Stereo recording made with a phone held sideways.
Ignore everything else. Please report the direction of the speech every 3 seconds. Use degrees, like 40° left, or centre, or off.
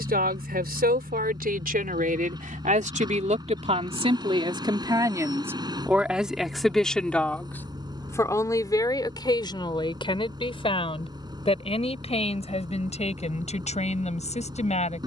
60° right, 30° right, 10° left, 30° left, 40° left.